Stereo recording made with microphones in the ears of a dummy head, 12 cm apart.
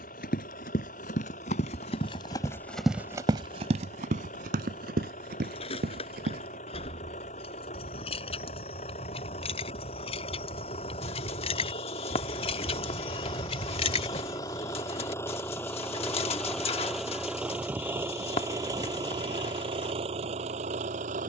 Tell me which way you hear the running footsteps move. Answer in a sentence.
In this clip you hear the running footsteps move from left to right.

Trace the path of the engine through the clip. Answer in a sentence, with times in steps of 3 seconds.
You can hear the engine on the left from 0 s, in the centre from 15 s and on the right from 18 s.